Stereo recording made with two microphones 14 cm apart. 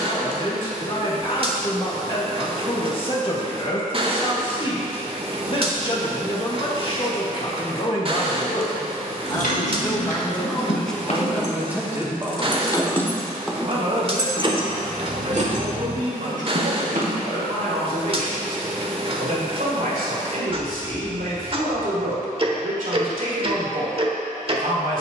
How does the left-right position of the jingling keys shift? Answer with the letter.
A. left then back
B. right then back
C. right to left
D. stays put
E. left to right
E.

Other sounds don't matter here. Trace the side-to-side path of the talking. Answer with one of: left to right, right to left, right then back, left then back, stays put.
left to right.